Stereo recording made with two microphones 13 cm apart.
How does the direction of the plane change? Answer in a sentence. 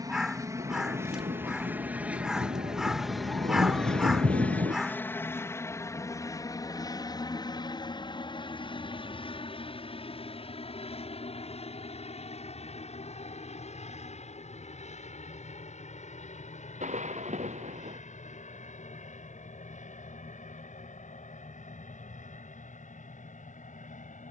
In this clip you hear the plane go from the right side to the left.